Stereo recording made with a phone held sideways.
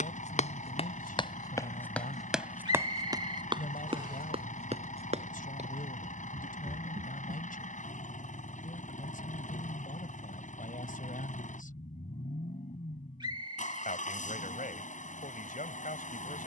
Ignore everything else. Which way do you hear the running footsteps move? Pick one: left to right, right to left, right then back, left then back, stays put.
left to right.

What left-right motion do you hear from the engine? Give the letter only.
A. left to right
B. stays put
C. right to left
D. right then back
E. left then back
B.